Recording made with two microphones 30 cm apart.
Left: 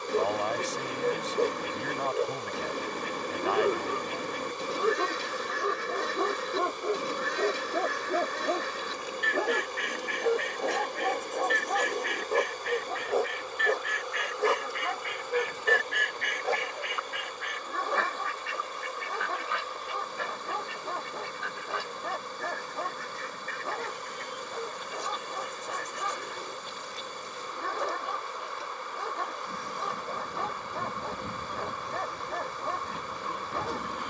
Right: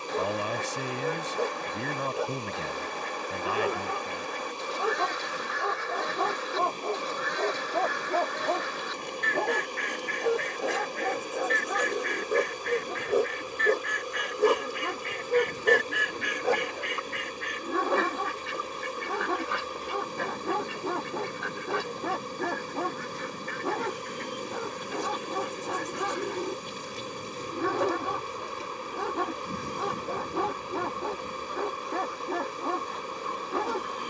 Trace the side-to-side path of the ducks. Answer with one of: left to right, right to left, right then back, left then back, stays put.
right then back.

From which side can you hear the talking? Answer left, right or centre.
right.